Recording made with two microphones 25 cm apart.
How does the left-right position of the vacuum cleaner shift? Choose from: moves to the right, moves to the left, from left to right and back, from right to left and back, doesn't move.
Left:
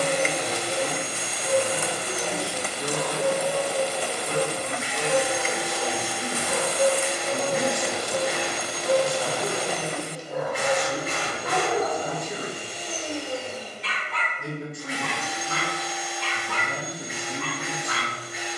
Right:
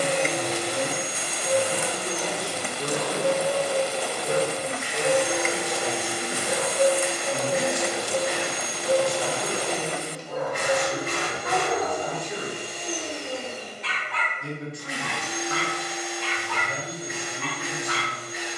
doesn't move.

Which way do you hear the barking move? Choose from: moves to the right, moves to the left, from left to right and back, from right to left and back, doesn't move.
moves to the left.